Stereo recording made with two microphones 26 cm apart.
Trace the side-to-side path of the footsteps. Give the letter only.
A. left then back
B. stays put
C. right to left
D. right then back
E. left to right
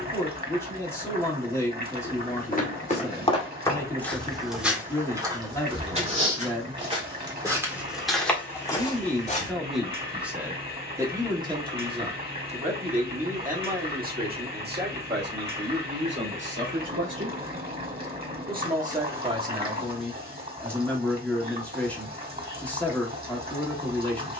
D.